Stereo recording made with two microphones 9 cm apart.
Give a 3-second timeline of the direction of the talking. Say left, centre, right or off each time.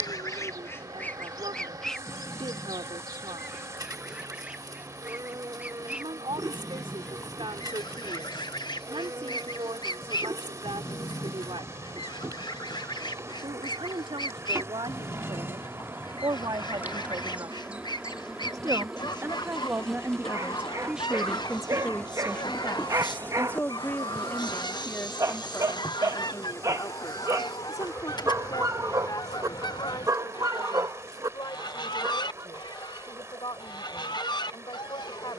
right, right, right, right, right, right, right, centre, left, left, left, left.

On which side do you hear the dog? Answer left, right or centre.
right.